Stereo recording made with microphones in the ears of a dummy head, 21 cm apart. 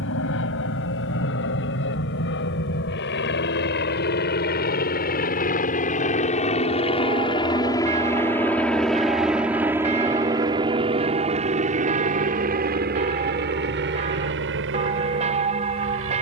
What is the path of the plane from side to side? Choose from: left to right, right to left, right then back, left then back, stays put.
left to right.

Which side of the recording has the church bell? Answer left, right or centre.
right.